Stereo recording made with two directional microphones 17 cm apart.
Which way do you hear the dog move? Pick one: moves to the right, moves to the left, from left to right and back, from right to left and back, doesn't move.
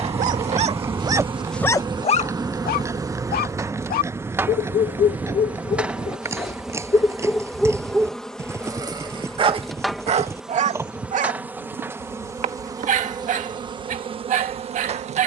from right to left and back.